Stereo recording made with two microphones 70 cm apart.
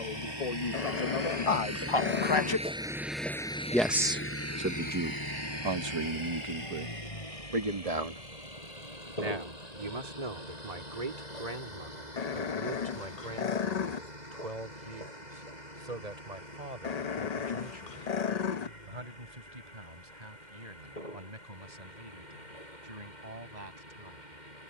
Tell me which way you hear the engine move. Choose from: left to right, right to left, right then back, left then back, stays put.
right to left.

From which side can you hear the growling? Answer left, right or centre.
left.